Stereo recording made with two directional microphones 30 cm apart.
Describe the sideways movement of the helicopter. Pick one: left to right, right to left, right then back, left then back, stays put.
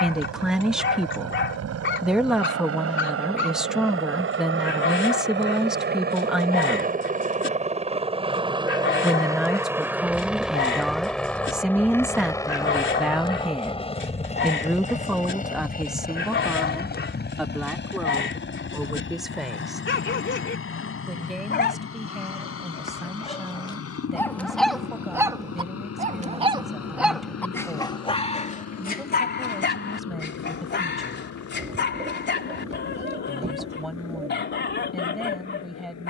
right to left.